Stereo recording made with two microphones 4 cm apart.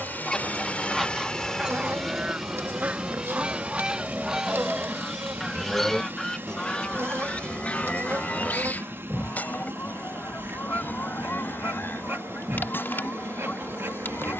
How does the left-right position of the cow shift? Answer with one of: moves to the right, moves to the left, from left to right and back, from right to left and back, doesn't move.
moves to the left.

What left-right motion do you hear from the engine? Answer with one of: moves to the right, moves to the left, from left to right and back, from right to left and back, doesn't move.
moves to the right.